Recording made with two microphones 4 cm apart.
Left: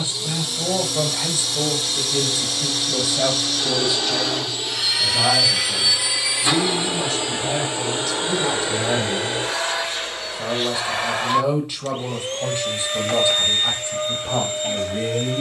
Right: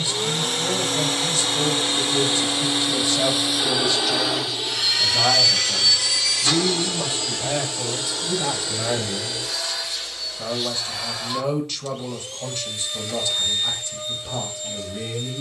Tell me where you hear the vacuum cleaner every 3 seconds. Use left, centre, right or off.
right, centre, left, left, left.